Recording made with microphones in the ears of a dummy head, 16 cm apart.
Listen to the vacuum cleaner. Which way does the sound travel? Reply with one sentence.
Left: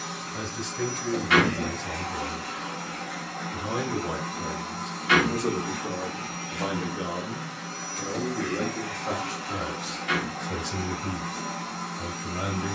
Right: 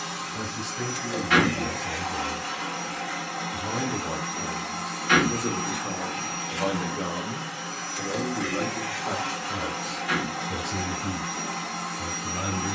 You can hear the vacuum cleaner stay in one place.